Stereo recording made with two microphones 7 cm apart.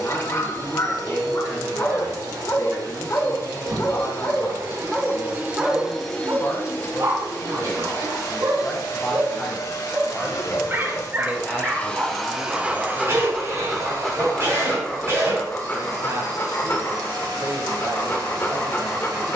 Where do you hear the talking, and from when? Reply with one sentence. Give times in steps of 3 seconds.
You can hear the talking on the left from 0 s, in the centre from 9 s and on the right from 12 s.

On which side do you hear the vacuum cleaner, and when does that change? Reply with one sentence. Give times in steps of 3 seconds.
In this clip you hear the vacuum cleaner on the right from 0 s, on the left from 6 s and on the right from 12 s.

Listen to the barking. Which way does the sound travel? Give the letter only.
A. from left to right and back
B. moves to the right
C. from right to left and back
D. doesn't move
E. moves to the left
A.